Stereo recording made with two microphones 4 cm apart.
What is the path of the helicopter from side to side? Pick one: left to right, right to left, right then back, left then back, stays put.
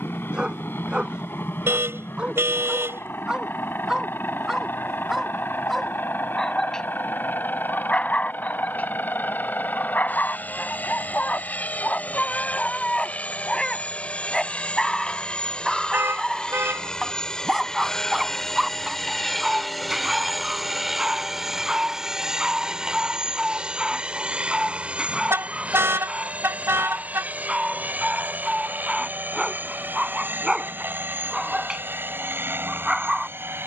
left to right.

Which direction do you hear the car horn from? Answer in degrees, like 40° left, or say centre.
70° right.